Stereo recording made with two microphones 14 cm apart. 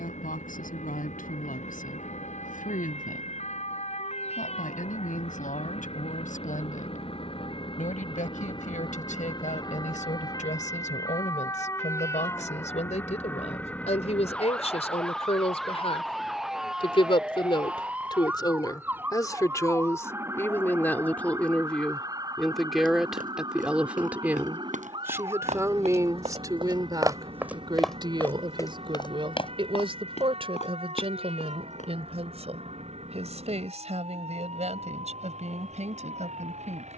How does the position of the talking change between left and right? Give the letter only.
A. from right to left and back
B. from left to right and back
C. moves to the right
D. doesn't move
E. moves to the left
C.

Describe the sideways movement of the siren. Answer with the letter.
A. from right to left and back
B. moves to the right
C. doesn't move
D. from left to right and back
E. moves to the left
B.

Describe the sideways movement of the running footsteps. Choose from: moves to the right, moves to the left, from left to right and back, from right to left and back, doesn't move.
moves to the left.